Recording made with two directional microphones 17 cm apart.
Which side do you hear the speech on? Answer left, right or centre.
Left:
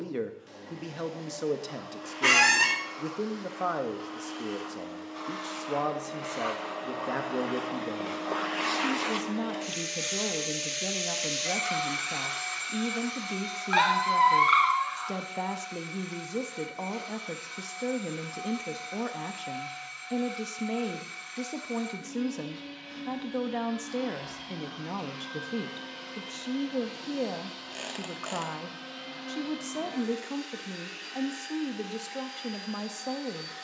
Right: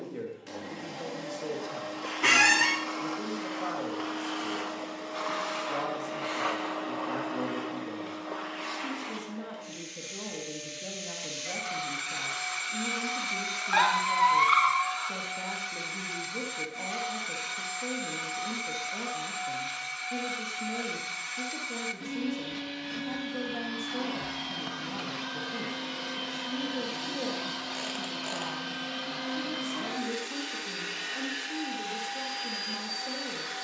left.